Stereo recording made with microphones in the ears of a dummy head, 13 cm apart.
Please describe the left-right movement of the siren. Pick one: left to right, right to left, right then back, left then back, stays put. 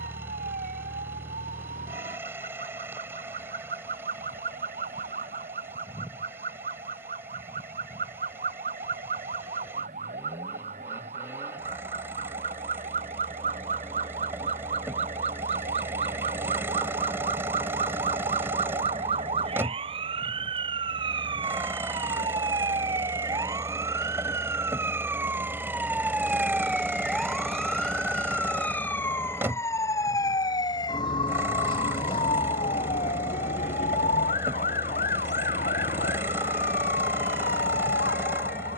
right to left.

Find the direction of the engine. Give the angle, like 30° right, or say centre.
20° right.